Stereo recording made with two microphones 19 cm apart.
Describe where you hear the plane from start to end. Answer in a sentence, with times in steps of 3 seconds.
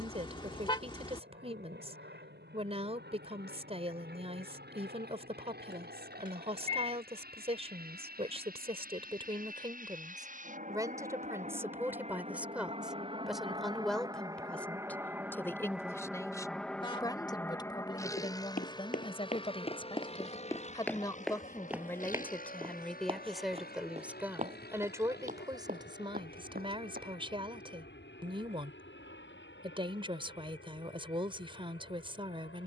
In this clip you hear the plane on the right from 0 s, in the centre from 15 s and on the left from 18 s.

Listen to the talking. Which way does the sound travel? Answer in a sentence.
In this clip you hear the talking go left and come back.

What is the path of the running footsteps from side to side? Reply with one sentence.
In this clip you hear the running footsteps move to the right.